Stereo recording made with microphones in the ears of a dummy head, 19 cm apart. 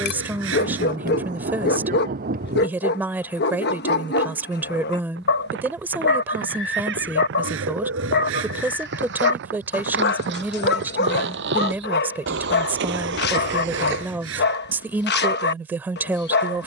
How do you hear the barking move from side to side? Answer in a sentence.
You can hear the barking stay in one place.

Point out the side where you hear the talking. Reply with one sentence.
You can hear the talking in the centre.